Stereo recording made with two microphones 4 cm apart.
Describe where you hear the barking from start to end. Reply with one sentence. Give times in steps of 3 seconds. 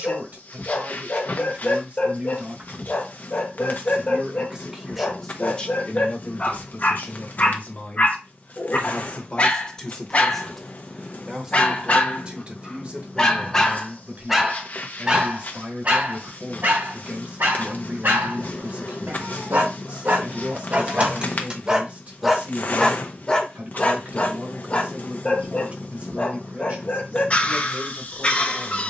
You can hear the barking on the left from 0 s, in the centre from 12 s, on the right from 15 s, in the centre from 21 s and on the left from 24 s.